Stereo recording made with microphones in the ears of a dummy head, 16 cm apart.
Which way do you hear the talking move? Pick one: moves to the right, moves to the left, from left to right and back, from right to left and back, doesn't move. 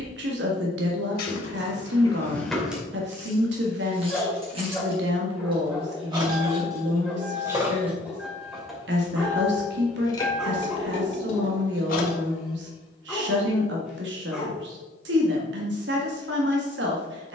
doesn't move.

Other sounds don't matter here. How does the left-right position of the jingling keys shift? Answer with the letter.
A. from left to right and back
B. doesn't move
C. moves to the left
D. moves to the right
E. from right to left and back
A.